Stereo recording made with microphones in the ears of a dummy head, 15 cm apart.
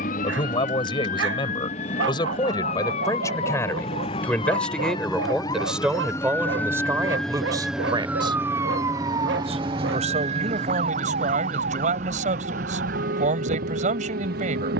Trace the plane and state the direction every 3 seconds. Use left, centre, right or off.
left, left, centre, right, right.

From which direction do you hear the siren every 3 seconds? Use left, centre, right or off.
left, left, centre, right, right.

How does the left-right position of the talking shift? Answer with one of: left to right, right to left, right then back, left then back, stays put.
left to right.